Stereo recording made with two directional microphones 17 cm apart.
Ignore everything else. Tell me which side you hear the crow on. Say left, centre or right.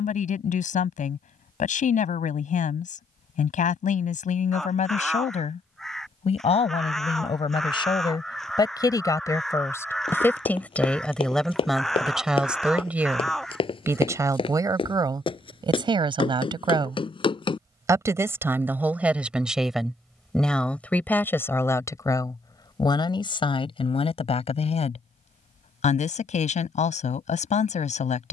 centre.